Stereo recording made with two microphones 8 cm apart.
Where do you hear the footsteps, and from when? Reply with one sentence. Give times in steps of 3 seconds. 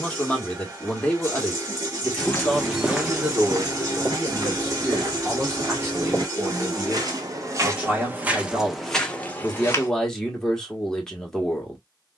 You can hear the footsteps in the centre from 0 s, on the right from 3 s and on the left from 9 s.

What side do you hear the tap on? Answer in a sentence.
In this clip you hear the tap on the right.